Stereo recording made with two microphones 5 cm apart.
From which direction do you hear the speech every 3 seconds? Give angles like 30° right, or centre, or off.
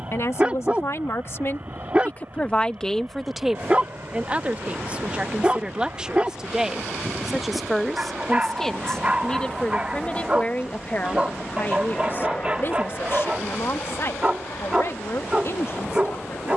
50° left, 20° right, centre, 30° left, 50° left, 60° left.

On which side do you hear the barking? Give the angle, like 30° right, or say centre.
20° right.